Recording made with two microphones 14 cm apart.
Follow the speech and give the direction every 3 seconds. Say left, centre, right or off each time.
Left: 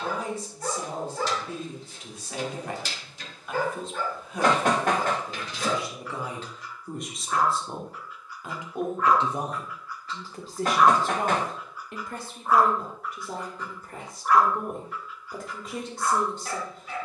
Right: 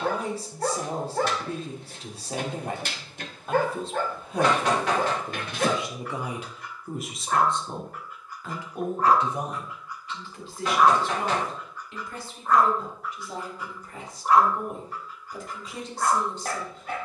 right, right, centre, left, left, left.